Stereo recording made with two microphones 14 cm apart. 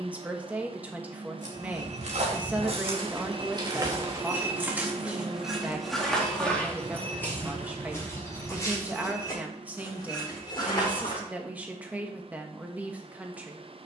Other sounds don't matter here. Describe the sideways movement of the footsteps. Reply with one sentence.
You can hear the footsteps go from the right side to the left.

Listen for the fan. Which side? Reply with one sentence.
You can hear the fan on the right.